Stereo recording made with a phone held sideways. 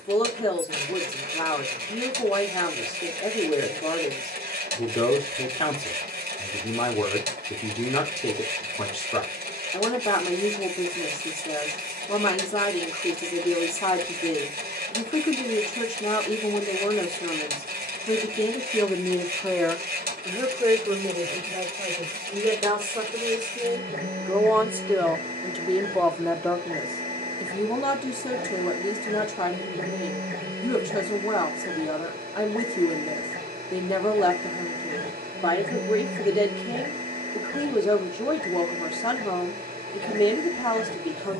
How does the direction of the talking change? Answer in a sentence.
You can hear the talking move from left to right and back again.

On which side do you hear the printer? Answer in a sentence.
In this clip you hear the printer on the right.